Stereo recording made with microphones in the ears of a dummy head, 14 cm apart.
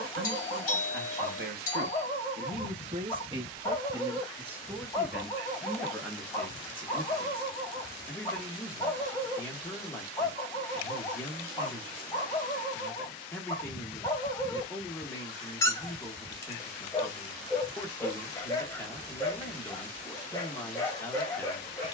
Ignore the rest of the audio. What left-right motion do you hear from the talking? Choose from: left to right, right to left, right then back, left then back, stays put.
right to left.